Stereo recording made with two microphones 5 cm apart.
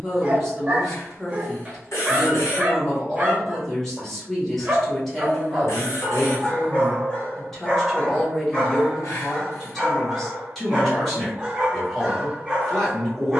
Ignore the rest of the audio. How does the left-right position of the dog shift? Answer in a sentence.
In this clip you hear the dog move from right to left and back again.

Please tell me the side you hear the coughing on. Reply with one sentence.
You can hear the coughing on the left.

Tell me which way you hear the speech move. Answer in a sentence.
In this clip you hear the speech stay put.